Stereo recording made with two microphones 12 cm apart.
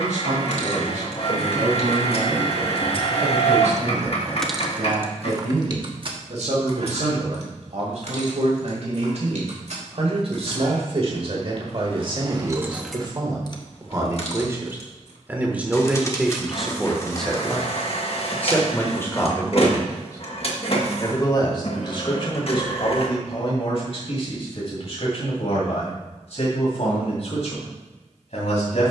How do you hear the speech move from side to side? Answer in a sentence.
You can hear the speech move from right to left.